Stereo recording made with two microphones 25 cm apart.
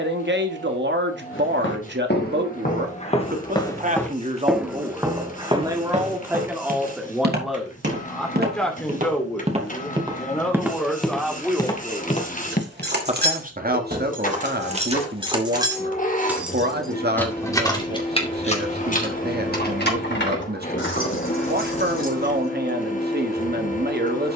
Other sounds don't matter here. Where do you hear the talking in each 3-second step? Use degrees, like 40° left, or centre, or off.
50° right, 20° right, centre, centre, 30° right, 40° right, 40° right, 40° right.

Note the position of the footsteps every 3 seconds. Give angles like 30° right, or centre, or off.
40° left, centre, 40° right, 10° right, 30° left, off, off, off.